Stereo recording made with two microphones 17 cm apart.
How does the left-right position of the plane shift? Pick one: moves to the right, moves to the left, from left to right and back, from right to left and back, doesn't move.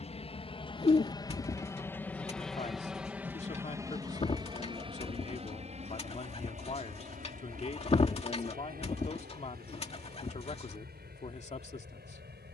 moves to the right.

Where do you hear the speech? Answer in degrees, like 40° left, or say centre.
40° left.